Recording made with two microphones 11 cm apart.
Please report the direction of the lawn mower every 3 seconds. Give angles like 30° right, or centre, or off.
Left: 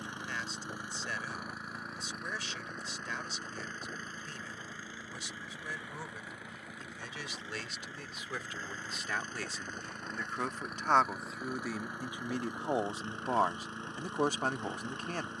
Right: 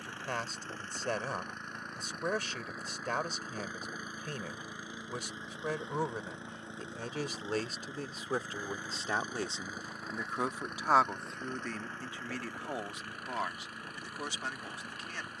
10° left, 10° right, 20° right, centre, 20° left.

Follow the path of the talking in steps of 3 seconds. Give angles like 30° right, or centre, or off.
50° right, 50° right, 40° right, 10° right, 40° left.